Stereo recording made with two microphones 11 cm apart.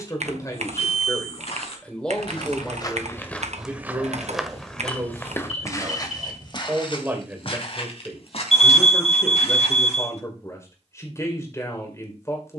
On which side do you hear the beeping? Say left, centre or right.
left.